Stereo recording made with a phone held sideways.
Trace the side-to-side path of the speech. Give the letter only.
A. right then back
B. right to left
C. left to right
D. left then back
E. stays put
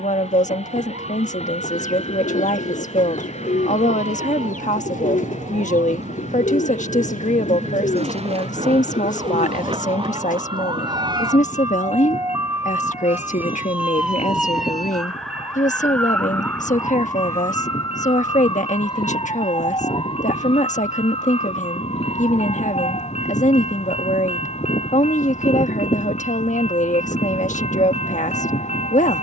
E.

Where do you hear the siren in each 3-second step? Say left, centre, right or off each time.
right, right, right, right, centre, centre, left, left, left, left.